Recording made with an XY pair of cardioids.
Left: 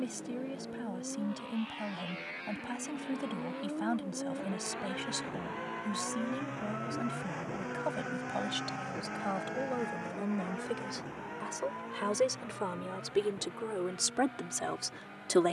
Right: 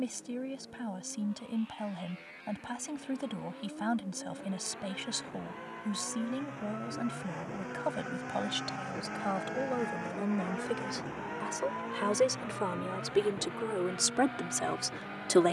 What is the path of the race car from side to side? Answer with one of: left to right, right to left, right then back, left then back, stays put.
left to right.